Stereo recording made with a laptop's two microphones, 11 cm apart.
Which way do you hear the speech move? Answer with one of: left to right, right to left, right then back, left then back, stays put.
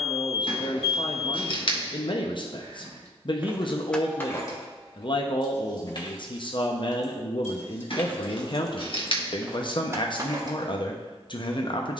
stays put.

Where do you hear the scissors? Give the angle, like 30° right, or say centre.
50° left.